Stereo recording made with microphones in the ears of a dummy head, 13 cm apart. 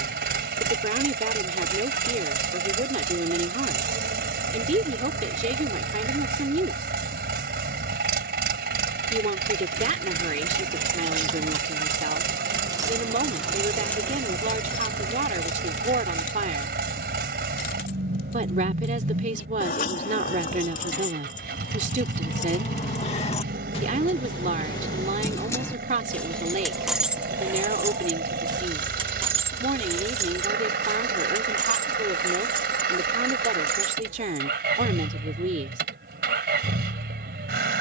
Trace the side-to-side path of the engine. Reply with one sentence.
In this clip you hear the engine stay in one place.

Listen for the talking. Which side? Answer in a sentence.
You can hear the talking on the right.